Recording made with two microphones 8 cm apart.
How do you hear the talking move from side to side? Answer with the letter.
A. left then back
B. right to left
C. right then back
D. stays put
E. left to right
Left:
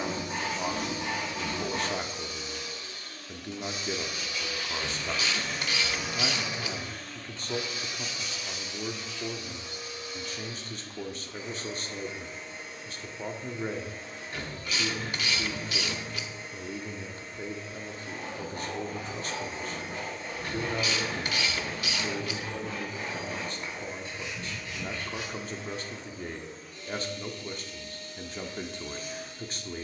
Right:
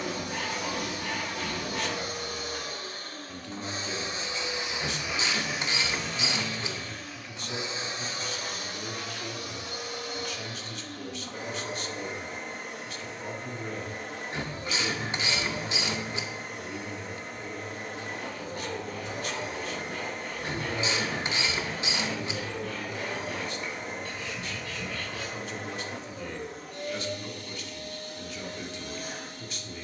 D.